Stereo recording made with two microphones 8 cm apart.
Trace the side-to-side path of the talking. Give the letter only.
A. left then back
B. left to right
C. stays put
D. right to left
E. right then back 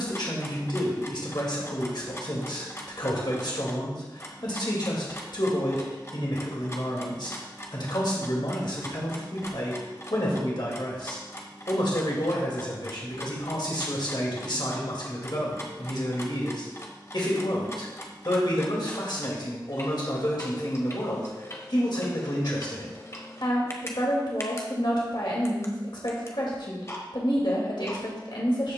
C.